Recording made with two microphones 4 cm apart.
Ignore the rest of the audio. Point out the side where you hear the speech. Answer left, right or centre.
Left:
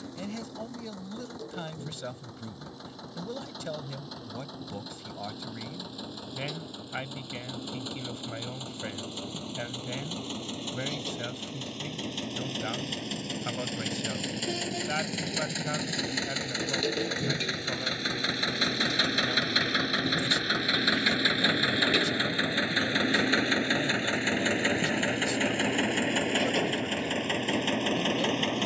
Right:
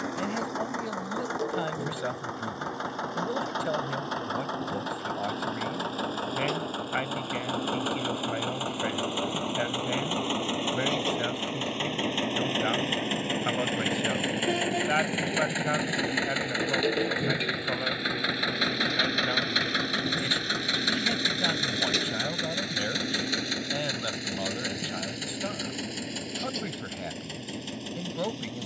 right.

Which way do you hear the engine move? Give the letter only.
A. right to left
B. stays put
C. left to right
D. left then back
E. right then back
A.